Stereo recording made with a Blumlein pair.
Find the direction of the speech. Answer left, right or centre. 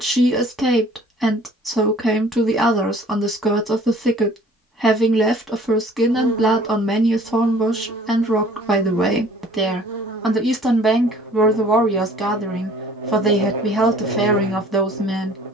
centre.